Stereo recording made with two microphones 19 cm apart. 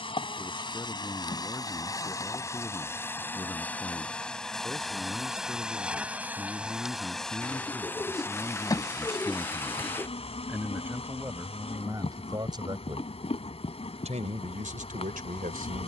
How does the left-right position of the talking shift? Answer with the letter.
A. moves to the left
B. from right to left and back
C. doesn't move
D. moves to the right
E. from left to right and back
D.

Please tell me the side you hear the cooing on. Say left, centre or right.
centre.